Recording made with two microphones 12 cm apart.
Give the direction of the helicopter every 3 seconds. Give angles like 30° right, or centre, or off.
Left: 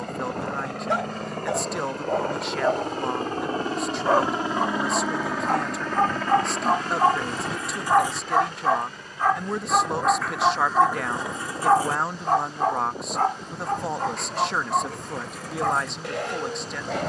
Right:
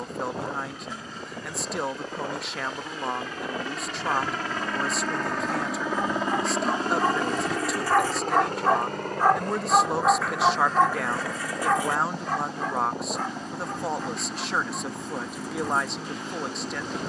60° left, 20° left, 40° right, 60° right, 70° right, 80° right.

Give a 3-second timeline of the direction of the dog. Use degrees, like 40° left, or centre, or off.
80° left, 70° left, 30° left, 10° left, 60° left, 80° left.